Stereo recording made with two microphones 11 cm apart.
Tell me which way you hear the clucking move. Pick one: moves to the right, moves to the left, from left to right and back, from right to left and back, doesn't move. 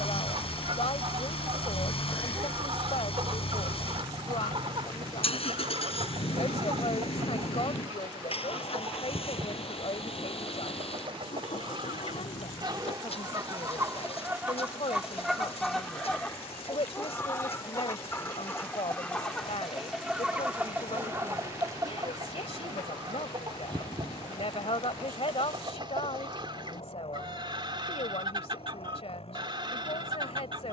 from right to left and back.